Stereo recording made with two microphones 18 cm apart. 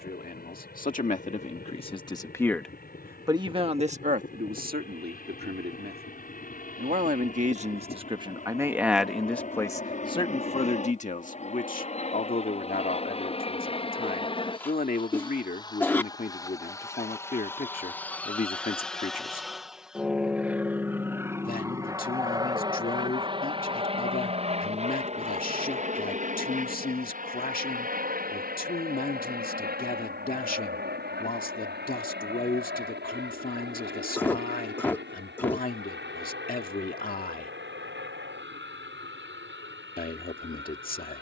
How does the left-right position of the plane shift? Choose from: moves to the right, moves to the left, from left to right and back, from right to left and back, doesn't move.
moves to the right.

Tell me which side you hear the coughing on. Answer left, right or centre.
centre.